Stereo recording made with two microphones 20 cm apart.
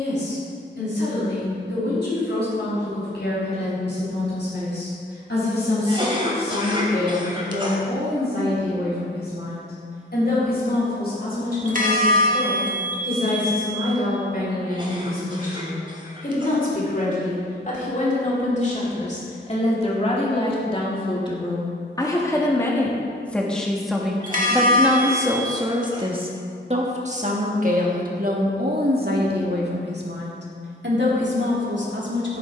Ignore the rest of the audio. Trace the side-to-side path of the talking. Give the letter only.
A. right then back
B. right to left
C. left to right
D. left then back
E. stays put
C.